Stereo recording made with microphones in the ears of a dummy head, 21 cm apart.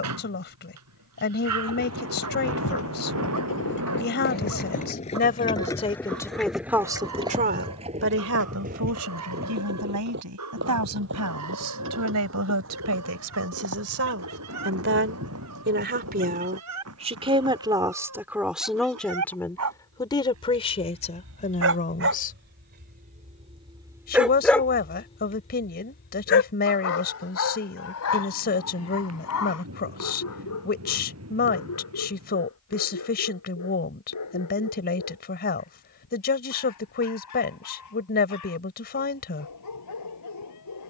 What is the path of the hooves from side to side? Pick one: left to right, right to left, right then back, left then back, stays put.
left to right.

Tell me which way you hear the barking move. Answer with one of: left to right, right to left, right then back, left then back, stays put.
right to left.